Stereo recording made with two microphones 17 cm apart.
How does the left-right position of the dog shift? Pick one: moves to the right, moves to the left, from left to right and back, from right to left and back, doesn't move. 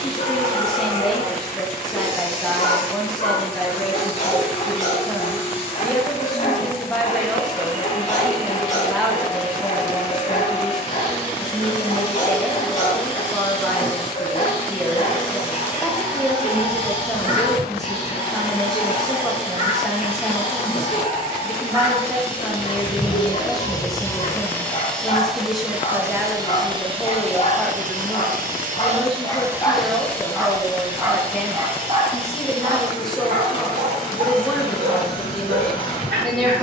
moves to the right.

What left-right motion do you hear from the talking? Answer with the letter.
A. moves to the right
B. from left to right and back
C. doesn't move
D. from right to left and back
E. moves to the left
C.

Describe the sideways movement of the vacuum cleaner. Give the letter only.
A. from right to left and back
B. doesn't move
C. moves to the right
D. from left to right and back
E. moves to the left
D.